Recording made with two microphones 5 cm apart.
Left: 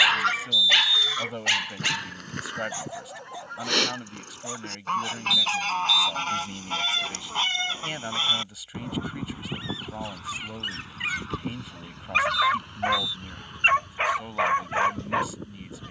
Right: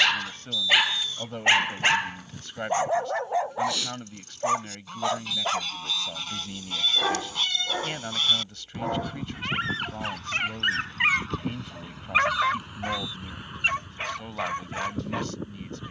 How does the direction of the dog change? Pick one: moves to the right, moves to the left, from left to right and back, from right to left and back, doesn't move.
from left to right and back.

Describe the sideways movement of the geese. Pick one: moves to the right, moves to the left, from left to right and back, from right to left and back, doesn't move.
moves to the right.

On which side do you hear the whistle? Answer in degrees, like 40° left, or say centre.
50° right.